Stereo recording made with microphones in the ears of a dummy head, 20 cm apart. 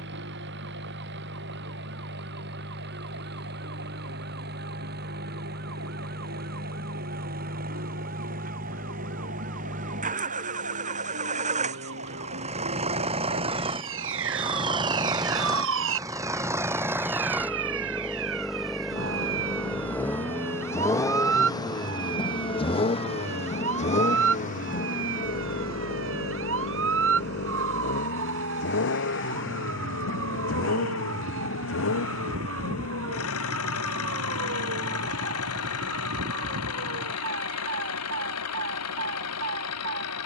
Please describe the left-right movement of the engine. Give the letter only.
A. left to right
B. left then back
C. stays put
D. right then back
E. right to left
E.